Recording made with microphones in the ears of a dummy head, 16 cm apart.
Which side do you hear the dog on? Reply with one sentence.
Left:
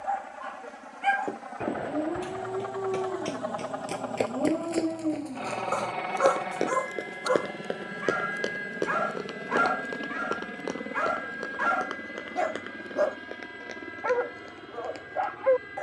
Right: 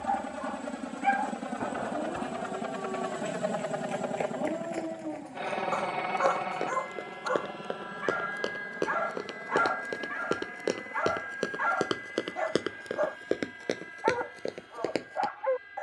You can hear the dog on the left.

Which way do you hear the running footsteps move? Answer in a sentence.
You can hear the running footsteps move to the right.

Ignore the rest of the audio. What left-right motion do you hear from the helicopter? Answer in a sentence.
You can hear the helicopter move to the left.